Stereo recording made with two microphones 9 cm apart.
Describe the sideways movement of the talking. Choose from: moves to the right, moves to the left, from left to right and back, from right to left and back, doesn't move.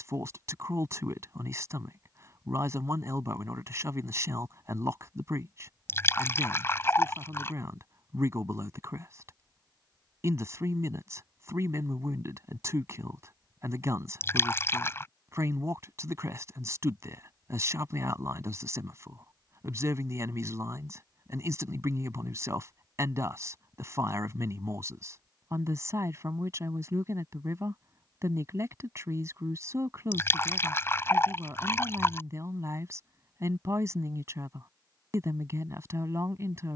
doesn't move.